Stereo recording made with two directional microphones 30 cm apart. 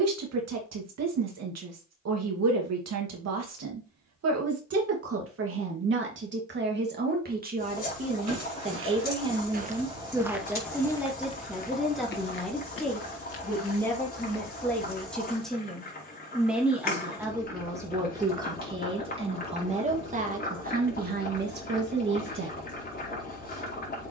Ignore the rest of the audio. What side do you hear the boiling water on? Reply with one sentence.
You can hear the boiling water on the left.